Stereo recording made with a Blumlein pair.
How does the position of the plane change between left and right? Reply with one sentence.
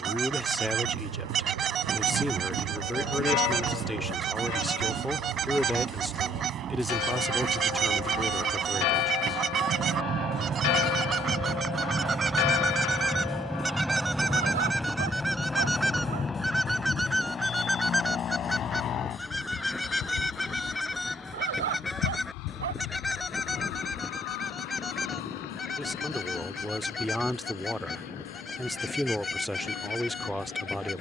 You can hear the plane move to the left.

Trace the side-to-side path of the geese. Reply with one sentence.
In this clip you hear the geese travel towards the left.